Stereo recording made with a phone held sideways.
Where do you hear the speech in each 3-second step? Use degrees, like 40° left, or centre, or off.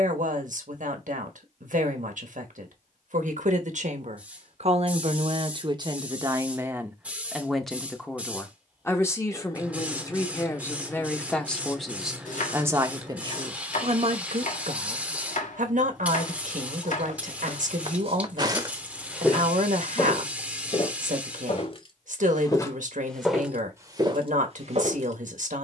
70° right, 50° right, centre, 20° left, 40° right, 70° right, 70° right, 70° right, 70° right.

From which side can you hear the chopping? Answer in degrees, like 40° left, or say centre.
70° left.